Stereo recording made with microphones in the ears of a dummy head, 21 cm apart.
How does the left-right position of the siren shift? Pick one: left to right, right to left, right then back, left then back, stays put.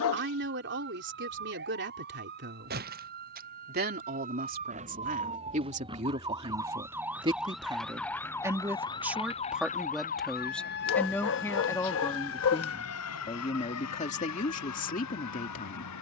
right to left.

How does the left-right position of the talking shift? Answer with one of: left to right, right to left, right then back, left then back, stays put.
right to left.